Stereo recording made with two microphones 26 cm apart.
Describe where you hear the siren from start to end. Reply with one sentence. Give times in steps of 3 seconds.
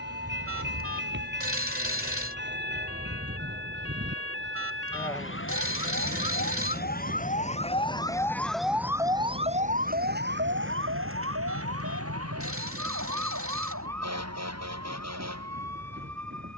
You can hear the siren on the left from 0 s and on the right from 9 s.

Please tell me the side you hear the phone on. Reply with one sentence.
You can hear the phone on the right.